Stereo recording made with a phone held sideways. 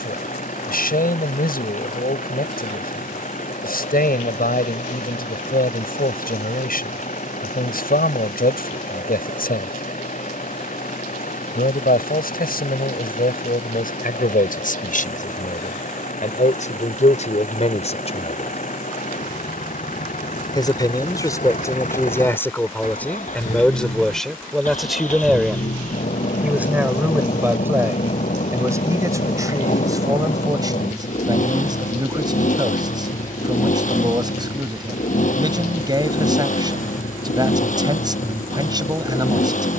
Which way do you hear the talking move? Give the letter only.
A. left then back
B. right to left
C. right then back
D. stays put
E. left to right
E.